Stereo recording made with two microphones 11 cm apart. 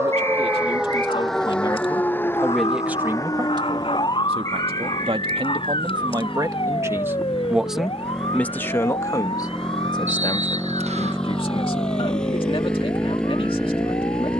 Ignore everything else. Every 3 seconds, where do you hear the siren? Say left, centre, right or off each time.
centre, left, left, left, left.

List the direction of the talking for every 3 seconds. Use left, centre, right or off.
left, right, centre, left, left.